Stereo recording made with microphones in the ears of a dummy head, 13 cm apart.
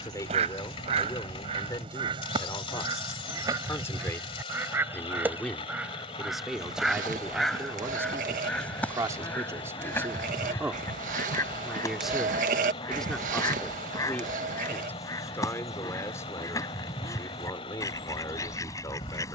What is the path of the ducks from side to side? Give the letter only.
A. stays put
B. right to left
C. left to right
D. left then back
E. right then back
B.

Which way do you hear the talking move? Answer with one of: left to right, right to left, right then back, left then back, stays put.
right then back.